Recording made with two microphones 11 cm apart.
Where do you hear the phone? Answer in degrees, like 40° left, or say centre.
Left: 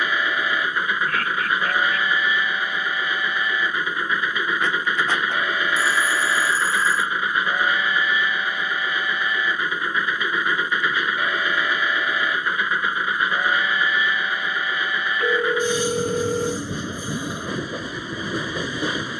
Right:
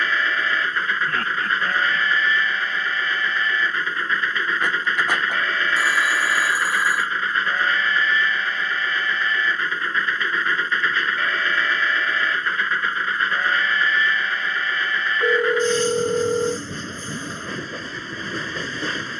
10° right.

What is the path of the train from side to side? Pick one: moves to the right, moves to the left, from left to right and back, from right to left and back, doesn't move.
doesn't move.